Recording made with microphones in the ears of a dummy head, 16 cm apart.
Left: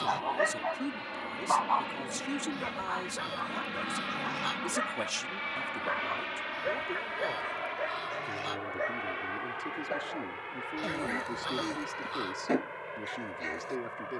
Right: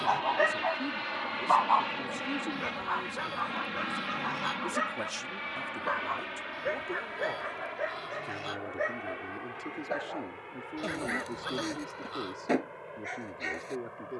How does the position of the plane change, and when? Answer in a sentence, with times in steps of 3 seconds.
You can hear the plane on the right from 0 s, in the centre from 3 s and on the left from 6 s.